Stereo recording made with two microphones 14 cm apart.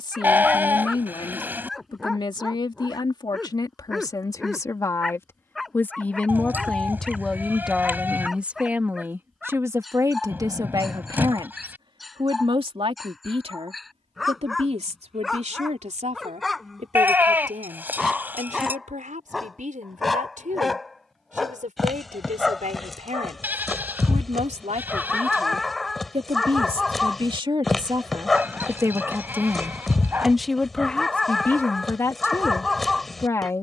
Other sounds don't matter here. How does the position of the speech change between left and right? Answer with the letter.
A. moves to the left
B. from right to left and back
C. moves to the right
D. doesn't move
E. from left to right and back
E.